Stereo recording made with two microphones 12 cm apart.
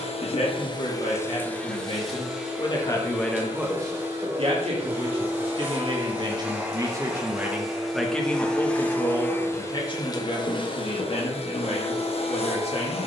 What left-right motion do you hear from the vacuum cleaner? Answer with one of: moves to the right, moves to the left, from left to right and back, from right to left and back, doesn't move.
from left to right and back.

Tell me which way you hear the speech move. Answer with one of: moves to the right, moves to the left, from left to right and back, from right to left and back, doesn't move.
from left to right and back.